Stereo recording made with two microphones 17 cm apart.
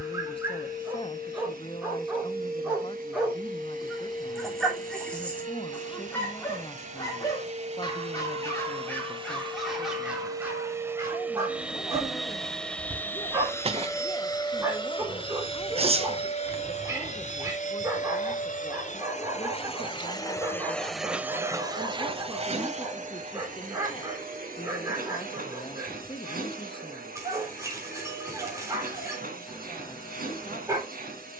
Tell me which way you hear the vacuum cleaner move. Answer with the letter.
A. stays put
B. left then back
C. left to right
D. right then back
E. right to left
B.